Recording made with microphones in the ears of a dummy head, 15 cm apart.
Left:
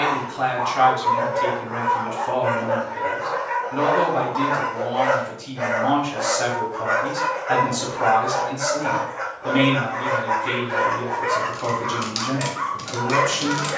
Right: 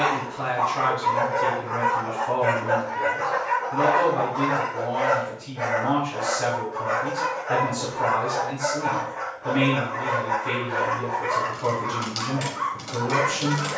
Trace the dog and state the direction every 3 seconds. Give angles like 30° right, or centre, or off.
70° right, 20° right, 10° left, 10° left, 10° left.